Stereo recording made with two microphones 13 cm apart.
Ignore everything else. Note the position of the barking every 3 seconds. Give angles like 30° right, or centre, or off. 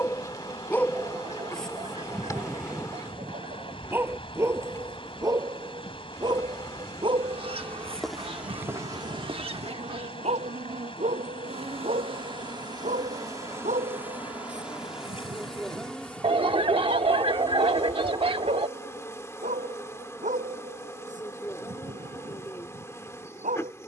10° left, 20° right, 40° right, 60° right, 70° right, 70° right, 70° right, 70° right.